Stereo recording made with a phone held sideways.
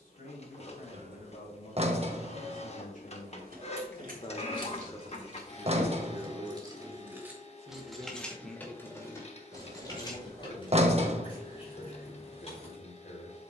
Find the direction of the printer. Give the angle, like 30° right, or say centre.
40° left.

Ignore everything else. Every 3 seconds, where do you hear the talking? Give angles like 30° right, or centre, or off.
70° left, 30° left, 20° right, 60° left, 70° left.